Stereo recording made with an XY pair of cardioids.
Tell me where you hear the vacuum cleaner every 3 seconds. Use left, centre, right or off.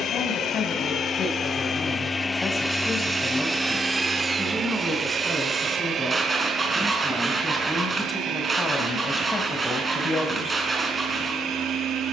left, right, right, right.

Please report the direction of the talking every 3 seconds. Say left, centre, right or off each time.
left, centre, centre, left.